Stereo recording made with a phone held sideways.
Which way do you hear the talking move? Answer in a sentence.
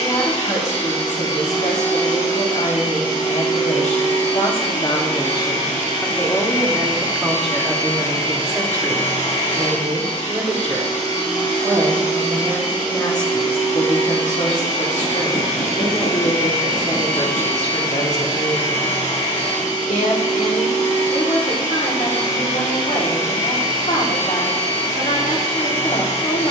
In this clip you hear the talking go right and come back.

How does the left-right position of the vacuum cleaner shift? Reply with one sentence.
In this clip you hear the vacuum cleaner stay put.